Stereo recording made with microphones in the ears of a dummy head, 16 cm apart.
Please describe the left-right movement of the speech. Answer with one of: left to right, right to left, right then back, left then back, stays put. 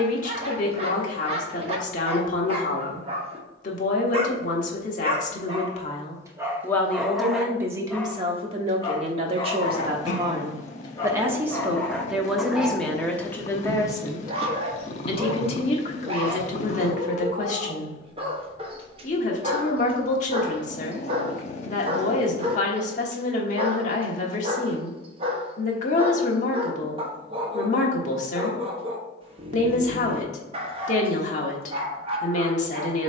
right then back.